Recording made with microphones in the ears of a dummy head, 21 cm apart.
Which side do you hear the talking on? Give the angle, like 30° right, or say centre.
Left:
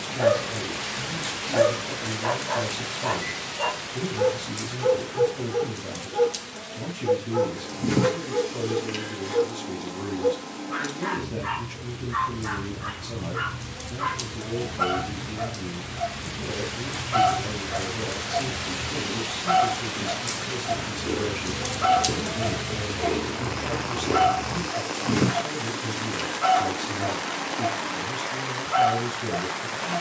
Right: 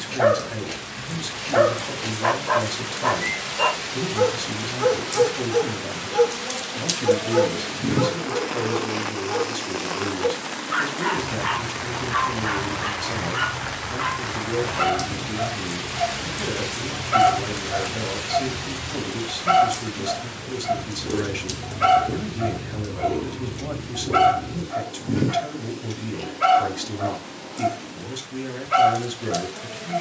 50° right.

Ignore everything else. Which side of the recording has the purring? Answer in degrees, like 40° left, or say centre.
50° left.